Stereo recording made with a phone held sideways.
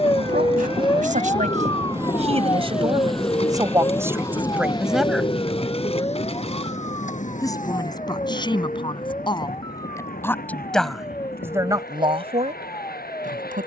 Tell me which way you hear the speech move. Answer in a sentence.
You can hear the speech move from right to left and back again.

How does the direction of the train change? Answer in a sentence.
In this clip you hear the train travel towards the left.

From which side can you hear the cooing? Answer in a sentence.
In this clip you hear the cooing on the left.